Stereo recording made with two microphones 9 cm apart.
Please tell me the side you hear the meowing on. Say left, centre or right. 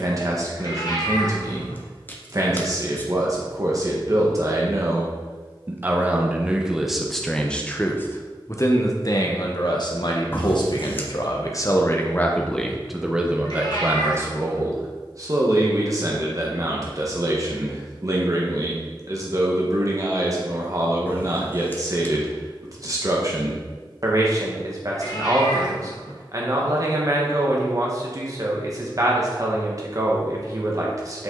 left.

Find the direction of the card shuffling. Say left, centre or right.
left.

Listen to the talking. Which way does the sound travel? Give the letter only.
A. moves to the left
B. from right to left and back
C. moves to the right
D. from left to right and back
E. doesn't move
B.